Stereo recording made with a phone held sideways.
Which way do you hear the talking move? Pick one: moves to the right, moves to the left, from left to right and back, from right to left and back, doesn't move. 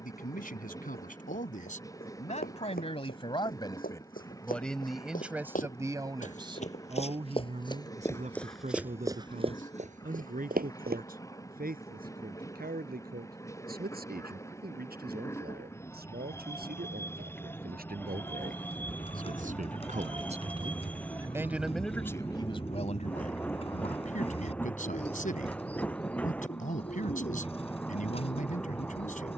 from left to right and back.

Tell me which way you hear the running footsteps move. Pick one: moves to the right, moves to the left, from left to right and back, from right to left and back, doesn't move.
moves to the right.